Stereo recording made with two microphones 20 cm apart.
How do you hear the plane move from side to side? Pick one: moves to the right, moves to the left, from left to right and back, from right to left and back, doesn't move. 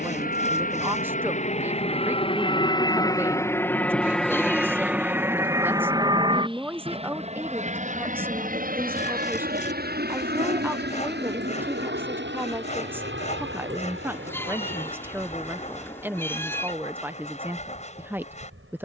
moves to the right.